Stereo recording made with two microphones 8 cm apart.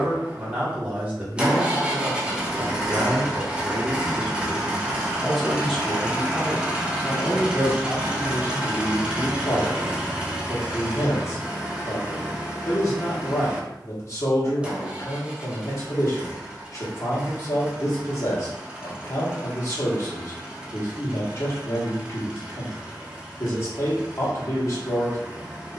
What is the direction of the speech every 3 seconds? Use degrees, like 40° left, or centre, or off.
20° right, 10° right, 30° left, 40° left, 40° left, 40° left, 40° left, 40° left, 40° left.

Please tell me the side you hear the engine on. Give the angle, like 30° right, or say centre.
10° right.